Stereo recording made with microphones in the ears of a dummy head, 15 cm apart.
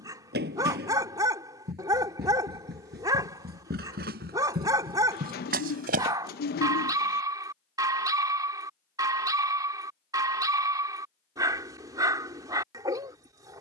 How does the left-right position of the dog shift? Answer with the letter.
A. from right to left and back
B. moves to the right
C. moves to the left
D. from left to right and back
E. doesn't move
E.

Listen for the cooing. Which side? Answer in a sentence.
In this clip you hear the cooing on the left.